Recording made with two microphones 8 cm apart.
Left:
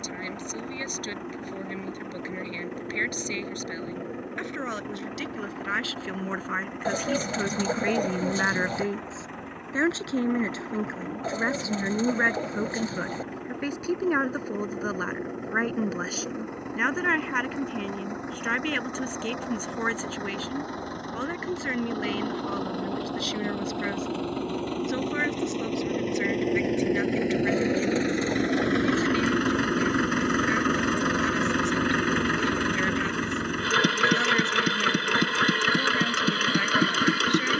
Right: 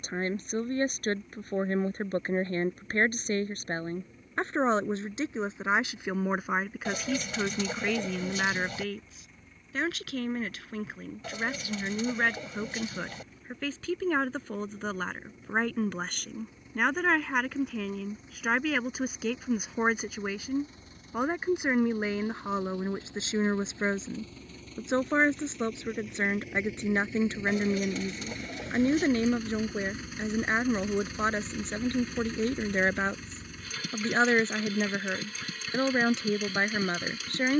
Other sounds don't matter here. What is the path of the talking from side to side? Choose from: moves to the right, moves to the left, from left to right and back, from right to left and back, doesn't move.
from right to left and back.